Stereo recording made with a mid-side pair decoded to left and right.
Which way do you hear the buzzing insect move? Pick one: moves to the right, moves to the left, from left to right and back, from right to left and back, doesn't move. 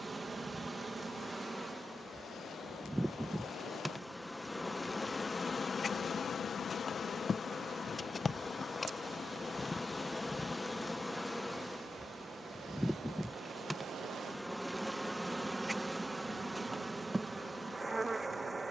from right to left and back.